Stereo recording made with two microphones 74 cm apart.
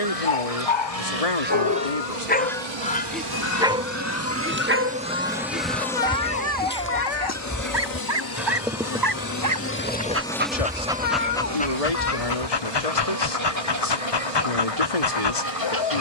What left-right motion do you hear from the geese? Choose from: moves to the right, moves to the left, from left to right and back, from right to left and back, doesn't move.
from right to left and back.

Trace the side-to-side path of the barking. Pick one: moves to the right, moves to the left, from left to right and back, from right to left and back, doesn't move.
from left to right and back.